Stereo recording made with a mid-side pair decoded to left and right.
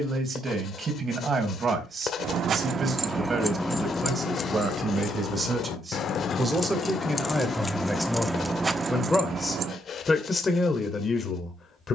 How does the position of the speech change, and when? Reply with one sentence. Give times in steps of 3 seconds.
You can hear the speech on the right from 0 s, in the centre from 6 s and on the left from 9 s.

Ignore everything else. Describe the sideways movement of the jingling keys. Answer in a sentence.
You can hear the jingling keys go left and come back.